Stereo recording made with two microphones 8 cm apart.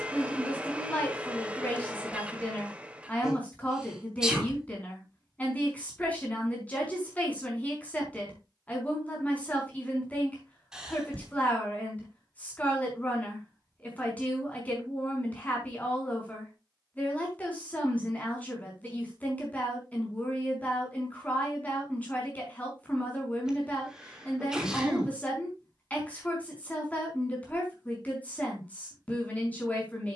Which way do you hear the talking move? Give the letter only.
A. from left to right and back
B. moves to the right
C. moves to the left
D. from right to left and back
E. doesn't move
E.